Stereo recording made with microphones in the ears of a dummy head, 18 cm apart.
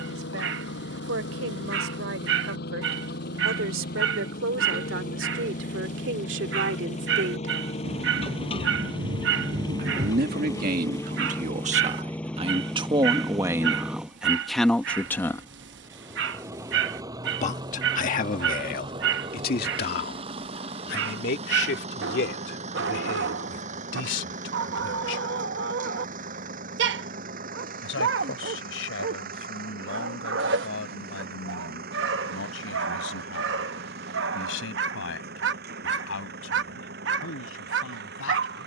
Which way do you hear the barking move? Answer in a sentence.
You can hear the barking stay in one place.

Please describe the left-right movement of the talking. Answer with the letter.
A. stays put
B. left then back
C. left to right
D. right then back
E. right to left
E.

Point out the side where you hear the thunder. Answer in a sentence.
In this clip you hear the thunder on the right.